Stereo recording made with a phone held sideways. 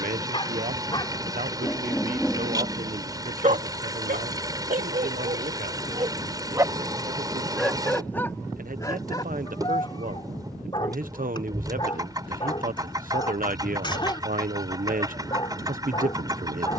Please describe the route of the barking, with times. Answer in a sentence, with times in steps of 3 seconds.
You can hear the barking in the centre from 0 s, on the right from 3 s, in the centre from 6 s and on the left from 9 s.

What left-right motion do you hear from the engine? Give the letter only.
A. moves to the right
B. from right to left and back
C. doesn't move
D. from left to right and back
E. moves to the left
C.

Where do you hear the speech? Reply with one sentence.
You can hear the speech on the right.